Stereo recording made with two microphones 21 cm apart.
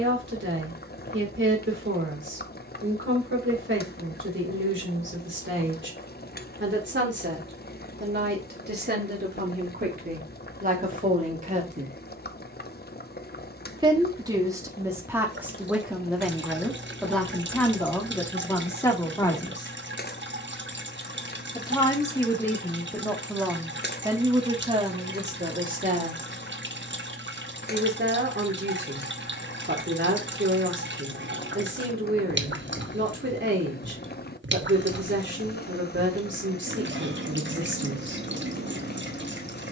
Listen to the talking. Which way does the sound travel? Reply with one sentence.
In this clip you hear the talking move from right to left and back again.